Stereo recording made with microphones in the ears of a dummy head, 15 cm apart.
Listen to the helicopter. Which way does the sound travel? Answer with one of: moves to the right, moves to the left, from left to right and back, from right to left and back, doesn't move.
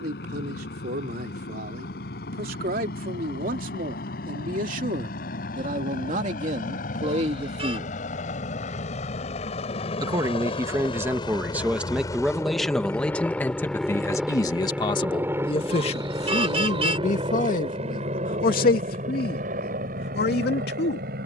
moves to the right.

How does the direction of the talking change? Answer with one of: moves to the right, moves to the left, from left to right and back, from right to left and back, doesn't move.
moves to the left.